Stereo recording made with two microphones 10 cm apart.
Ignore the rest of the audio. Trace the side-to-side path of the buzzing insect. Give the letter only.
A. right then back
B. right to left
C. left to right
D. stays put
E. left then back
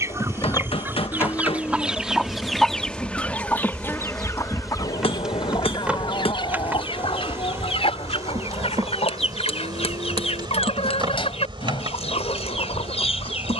C.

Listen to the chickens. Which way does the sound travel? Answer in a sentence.
In this clip you hear the chickens travel towards the left.